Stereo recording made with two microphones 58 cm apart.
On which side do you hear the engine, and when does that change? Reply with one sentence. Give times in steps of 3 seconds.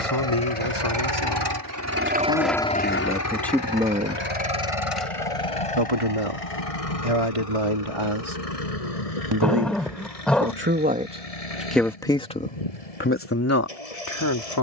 You can hear the engine on the right from 0 s and on the left from 3 s.